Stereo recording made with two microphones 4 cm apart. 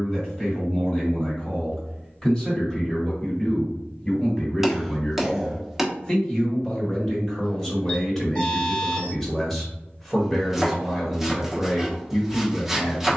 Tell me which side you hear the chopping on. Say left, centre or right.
centre.